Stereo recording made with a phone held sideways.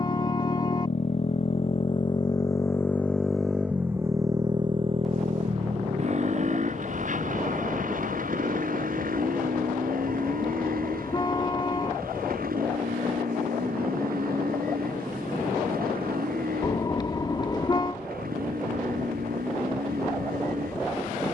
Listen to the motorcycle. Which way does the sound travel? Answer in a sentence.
You can hear the motorcycle move to the right.